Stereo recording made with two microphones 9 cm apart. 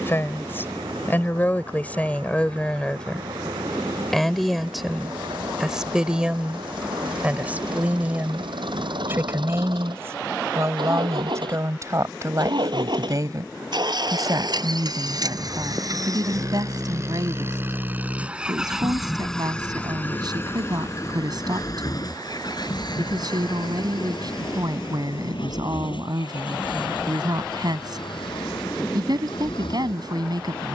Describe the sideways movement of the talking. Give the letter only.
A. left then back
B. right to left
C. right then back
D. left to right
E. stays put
D.